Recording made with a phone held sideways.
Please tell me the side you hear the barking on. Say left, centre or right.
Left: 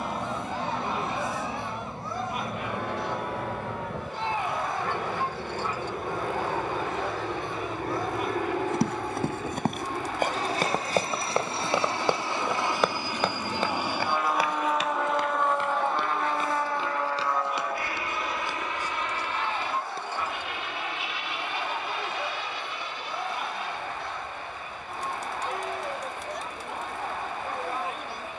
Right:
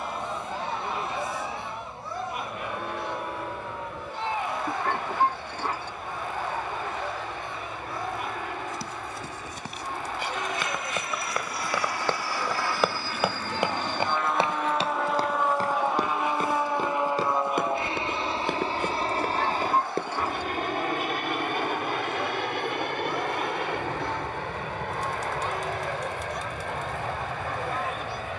right.